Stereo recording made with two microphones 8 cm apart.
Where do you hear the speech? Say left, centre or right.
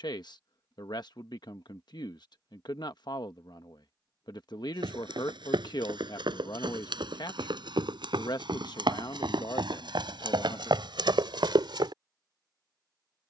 left.